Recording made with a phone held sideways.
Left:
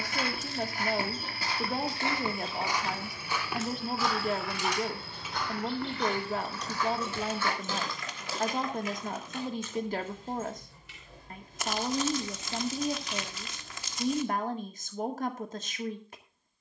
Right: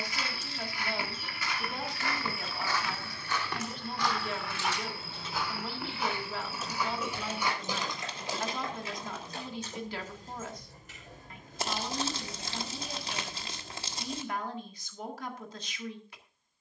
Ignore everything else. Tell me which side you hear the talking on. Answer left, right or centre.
left.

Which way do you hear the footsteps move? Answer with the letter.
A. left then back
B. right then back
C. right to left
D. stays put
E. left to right
E.